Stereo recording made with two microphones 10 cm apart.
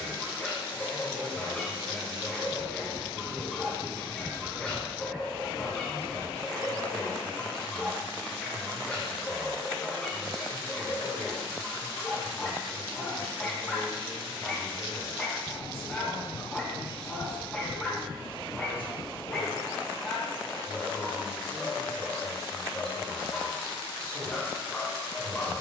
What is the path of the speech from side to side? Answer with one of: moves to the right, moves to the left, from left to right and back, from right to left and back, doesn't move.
doesn't move.